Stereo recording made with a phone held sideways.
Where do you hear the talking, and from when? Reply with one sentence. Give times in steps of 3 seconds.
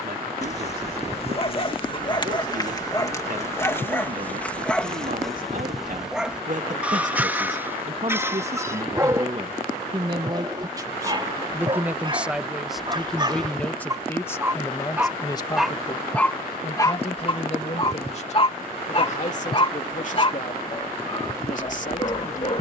In this clip you hear the talking on the right from 0 s, in the centre from 12 s and on the left from 15 s.